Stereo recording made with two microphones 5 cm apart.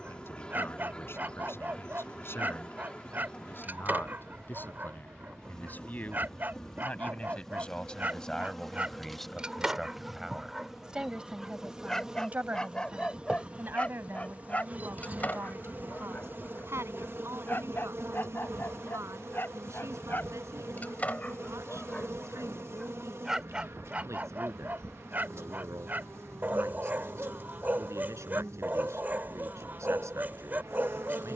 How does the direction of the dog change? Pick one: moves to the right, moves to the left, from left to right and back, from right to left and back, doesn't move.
from right to left and back.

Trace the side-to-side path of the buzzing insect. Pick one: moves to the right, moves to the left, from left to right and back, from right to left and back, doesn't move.
moves to the right.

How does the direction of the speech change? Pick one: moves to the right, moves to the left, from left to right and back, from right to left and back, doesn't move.
moves to the right.